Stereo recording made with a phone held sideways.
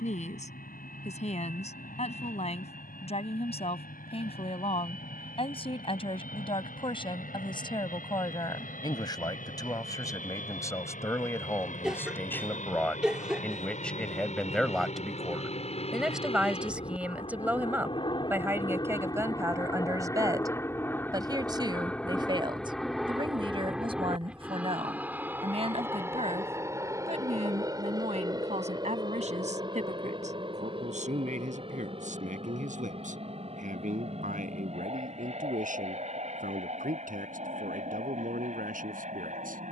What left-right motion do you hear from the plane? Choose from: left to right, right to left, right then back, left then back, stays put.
left to right.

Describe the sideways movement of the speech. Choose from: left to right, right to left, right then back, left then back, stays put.
left to right.